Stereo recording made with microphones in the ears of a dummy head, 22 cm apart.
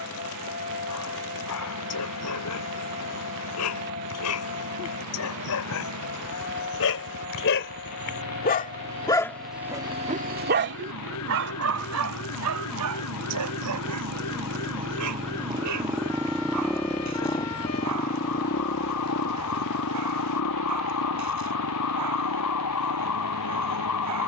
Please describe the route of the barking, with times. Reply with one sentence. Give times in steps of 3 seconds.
In this clip you hear the barking on the left from 0 s and on the right from 9 s.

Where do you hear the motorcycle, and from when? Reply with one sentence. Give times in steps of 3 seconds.
You can hear the motorcycle on the right from 0 s, in the centre from 15 s and on the left from 18 s.